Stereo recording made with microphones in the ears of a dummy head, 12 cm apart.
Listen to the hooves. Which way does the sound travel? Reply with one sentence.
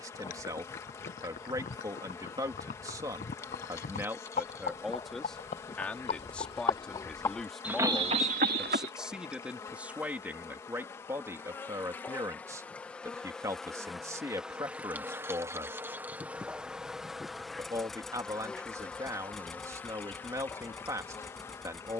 In this clip you hear the hooves move to the right.